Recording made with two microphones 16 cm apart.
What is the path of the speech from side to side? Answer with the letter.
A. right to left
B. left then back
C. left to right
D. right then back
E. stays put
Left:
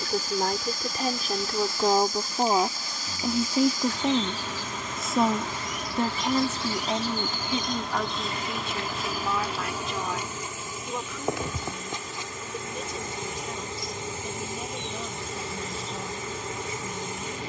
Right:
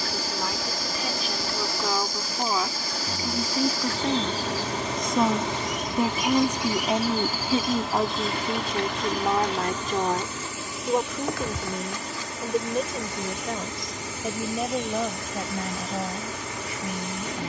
C.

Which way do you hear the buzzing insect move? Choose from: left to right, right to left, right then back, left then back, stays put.
right to left.